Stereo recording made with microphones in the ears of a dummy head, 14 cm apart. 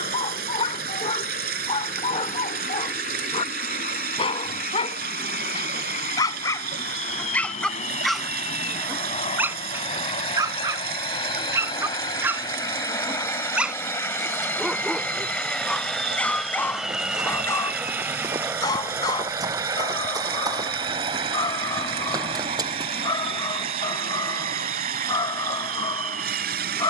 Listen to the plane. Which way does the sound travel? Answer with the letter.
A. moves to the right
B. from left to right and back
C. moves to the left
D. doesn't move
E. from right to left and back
A.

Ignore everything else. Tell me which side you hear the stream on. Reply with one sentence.
You can hear the stream on the right.